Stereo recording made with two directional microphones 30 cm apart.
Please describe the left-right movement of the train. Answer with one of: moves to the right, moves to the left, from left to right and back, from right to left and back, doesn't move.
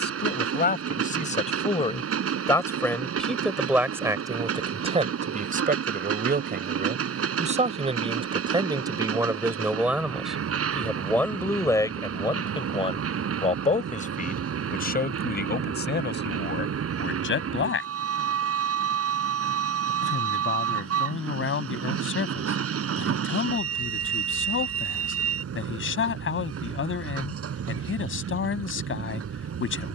doesn't move.